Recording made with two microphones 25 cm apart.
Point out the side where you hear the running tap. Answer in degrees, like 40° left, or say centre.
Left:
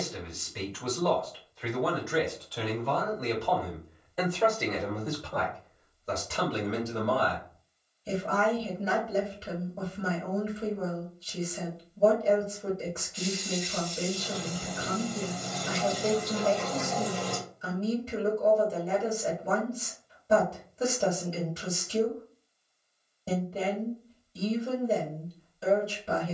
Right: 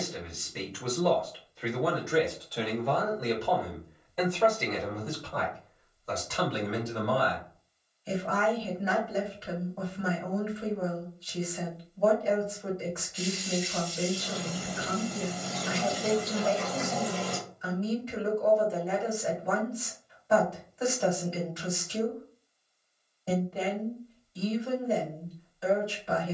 10° right.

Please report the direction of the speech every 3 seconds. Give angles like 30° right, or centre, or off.
30° right, 10° left, 30° left, 30° left, 30° left, 30° left, 30° left, 30° left, 30° left.